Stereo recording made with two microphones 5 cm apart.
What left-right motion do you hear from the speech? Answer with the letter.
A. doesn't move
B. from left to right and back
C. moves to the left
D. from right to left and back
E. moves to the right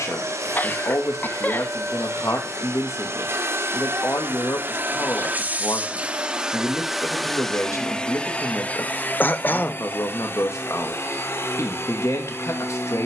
A.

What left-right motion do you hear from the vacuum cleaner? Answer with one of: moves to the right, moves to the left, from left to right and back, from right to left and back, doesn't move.
moves to the left.